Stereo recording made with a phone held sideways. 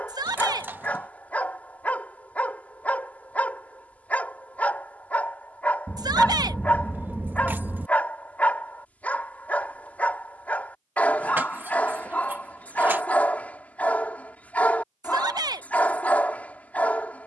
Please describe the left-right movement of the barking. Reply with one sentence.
In this clip you hear the barking stay in one place.